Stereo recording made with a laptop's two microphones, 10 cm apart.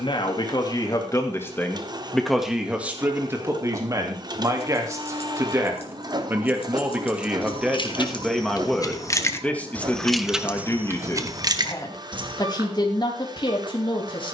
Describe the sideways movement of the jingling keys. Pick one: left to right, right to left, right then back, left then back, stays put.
left to right.